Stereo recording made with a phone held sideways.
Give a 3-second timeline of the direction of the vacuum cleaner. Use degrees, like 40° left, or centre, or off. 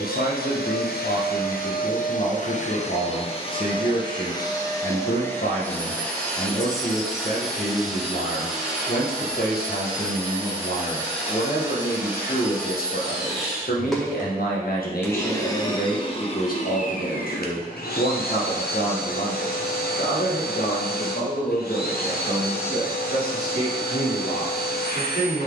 60° left, 20° left, centre, 10° right, centre, 40° left, 70° left, 70° left, 70° left.